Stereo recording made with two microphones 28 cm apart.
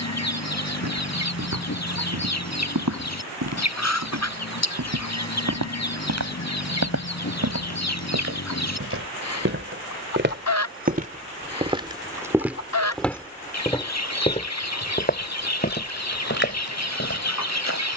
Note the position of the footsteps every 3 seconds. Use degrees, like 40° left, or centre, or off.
80° right, 70° right, 60° right, 30° right, 10° left, 40° left.